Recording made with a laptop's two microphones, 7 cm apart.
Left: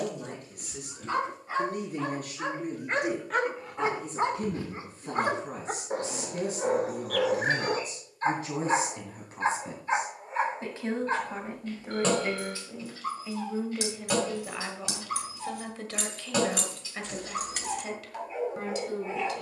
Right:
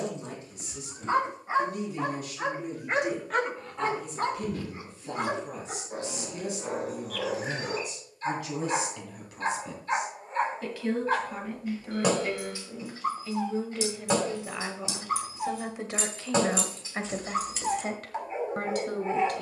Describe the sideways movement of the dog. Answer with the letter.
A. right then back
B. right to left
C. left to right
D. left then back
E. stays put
D.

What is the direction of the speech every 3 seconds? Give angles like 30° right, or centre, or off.
50° left, 50° left, 40° left, 30° left, 10° left, 30° right, 50° right.